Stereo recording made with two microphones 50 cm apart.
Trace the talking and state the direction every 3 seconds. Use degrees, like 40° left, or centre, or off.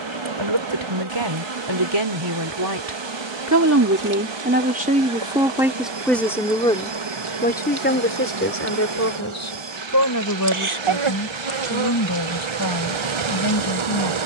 50° right, 20° right, 20° left, 40° left, 50° left.